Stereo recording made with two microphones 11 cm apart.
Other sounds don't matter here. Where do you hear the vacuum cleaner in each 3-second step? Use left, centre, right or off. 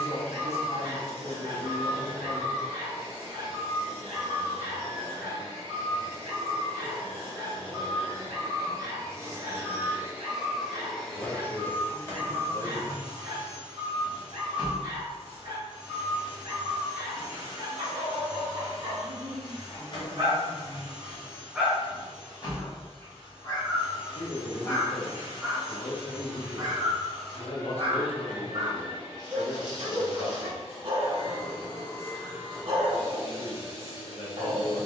right, right, right, centre, left, left, left, left, left, left, left, left.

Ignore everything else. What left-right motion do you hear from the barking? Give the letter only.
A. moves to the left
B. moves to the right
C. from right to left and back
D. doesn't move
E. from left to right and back
C.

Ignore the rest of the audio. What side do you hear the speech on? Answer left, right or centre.
left.